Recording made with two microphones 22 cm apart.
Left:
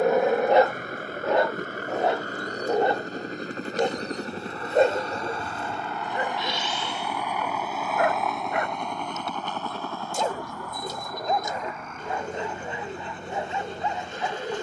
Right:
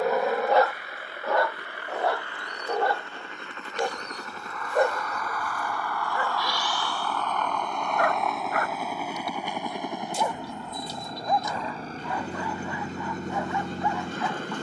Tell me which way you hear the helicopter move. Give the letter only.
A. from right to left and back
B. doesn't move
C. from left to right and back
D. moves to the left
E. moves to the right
E.